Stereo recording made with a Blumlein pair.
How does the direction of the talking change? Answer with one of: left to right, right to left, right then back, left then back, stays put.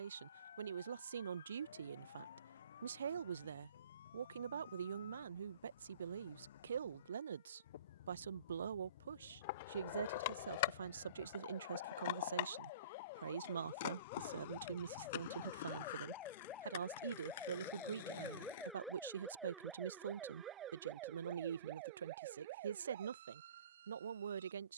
stays put.